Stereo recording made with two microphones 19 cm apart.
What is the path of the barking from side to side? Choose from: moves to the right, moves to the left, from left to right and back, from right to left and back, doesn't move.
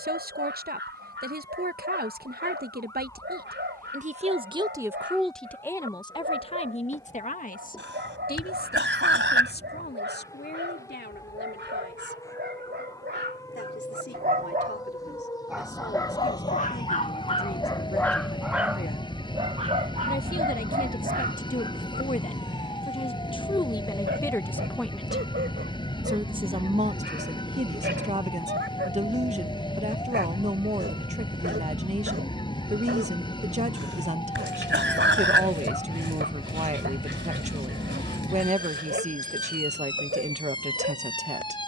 from right to left and back.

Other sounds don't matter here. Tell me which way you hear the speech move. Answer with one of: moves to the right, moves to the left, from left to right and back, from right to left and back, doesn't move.
from right to left and back.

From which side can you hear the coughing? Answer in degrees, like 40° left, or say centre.
70° right.